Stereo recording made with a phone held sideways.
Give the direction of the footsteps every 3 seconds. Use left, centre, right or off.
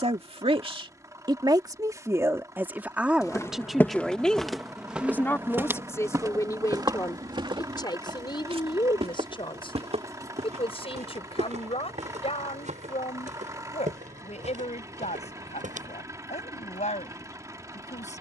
off, centre, right, right, right, right.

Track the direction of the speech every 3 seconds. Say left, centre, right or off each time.
right, centre, left, left, left, left.